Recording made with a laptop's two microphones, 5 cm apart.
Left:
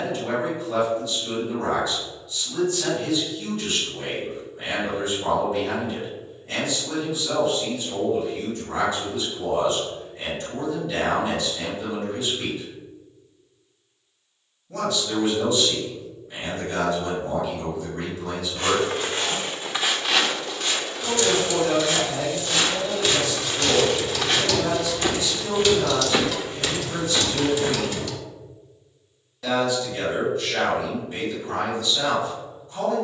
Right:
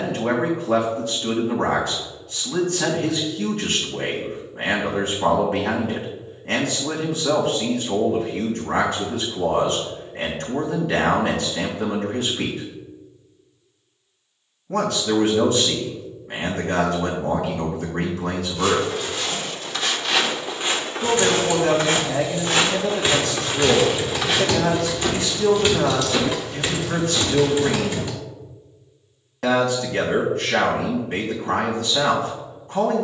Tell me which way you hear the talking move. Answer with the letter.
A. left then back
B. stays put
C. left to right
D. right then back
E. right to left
B.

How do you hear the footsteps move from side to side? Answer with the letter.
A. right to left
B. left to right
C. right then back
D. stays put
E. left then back
C.